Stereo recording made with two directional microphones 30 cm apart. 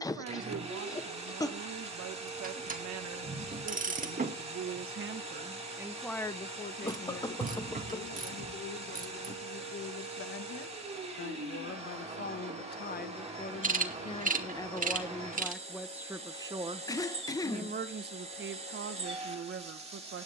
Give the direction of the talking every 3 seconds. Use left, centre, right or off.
right, right, left, left, left, centre, right.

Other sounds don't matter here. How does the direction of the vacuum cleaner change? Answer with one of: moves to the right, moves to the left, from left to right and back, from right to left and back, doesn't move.
doesn't move.